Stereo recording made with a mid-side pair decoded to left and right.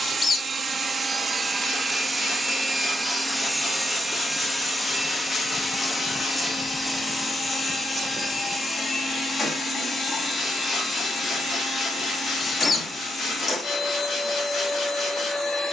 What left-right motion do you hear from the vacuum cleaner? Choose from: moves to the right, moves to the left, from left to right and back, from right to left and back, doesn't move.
moves to the left.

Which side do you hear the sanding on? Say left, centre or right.
left.